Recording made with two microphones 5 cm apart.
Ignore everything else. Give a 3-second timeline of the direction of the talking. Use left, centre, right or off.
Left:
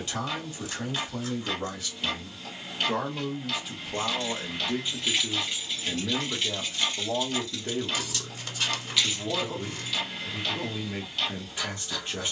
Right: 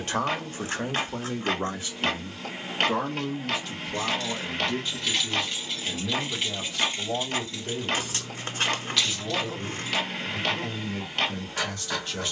right, centre, left, left.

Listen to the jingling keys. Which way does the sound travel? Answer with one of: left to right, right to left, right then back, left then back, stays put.
right then back.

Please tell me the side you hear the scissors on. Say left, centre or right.
right.